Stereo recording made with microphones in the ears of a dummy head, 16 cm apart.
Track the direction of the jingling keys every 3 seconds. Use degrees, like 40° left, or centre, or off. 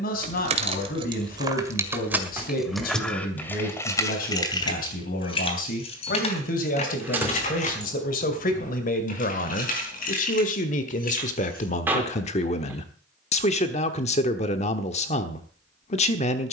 20° right, 20° left, 40° left, 50° left, off, off.